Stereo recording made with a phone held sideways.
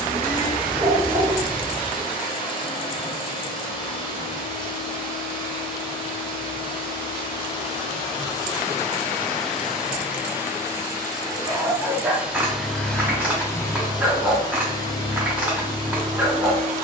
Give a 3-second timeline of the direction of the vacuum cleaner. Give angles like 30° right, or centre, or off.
30° left, 30° left, 30° left, 10° right, 10° left, 30° left.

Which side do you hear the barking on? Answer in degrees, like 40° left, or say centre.
10° right.